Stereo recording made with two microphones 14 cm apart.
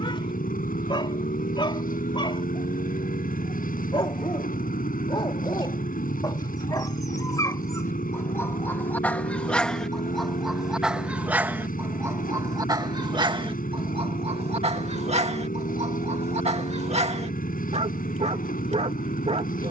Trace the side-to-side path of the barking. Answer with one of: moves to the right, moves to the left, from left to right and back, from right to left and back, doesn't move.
moves to the right.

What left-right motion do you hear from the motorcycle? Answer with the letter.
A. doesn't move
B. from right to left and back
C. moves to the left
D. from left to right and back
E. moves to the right
A.